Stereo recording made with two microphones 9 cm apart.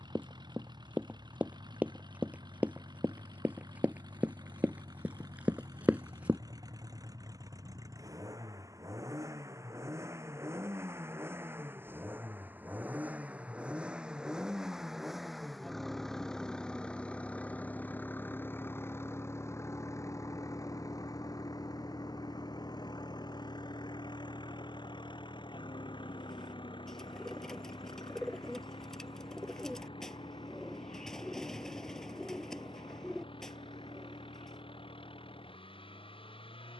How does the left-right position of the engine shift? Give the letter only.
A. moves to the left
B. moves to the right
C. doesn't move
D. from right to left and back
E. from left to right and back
A.